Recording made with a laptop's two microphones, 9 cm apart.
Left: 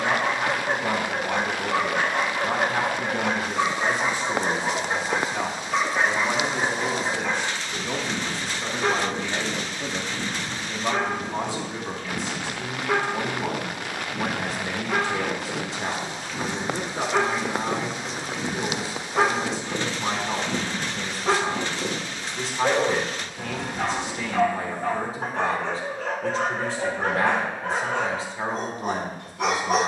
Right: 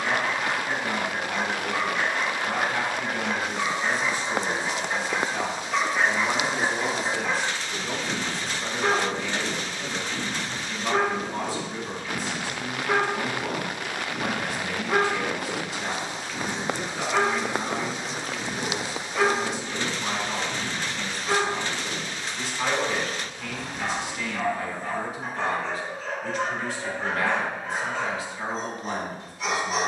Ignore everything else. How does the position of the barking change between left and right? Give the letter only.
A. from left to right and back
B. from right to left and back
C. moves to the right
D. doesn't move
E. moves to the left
A.